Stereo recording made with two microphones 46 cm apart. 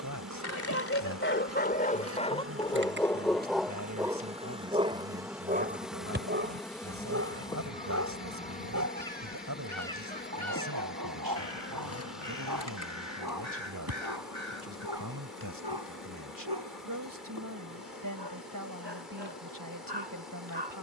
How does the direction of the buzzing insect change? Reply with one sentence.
You can hear the buzzing insect move from right to left.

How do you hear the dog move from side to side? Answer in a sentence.
You can hear the dog move to the right.